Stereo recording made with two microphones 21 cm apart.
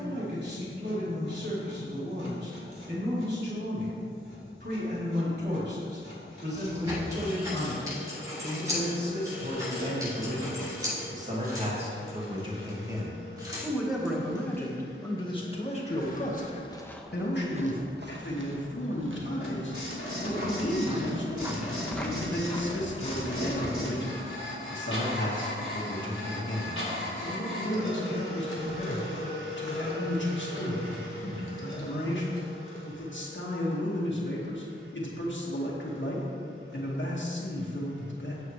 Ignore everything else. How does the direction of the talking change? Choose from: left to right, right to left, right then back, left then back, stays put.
right to left.